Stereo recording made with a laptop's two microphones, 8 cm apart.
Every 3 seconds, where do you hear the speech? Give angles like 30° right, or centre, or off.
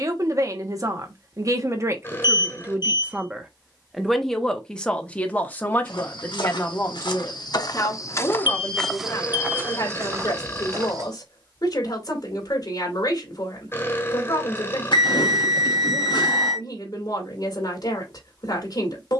40° right, 10° left, 40° left, 50° left, 50° left, 50° left, 50° left.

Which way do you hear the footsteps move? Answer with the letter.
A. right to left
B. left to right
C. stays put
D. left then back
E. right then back
B.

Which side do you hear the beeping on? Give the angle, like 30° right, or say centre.
60° left.